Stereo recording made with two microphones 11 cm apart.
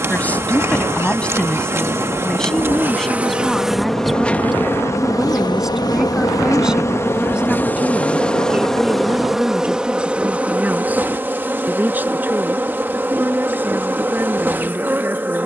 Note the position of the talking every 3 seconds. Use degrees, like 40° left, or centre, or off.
10° left, centre, 10° right, 10° right, 20° right.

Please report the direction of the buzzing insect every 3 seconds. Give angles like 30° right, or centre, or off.
20° right, 10° left, 20° left, 10° right, 20° right.